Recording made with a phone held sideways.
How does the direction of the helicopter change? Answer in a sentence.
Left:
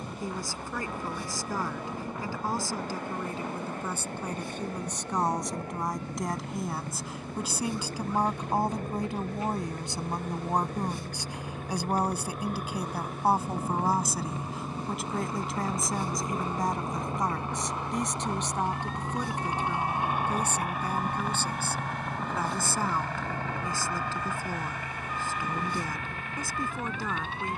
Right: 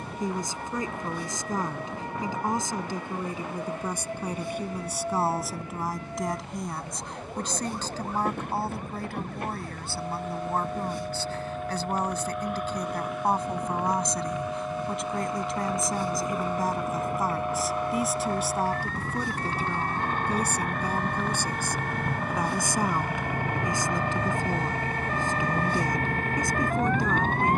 In this clip you hear the helicopter move to the right.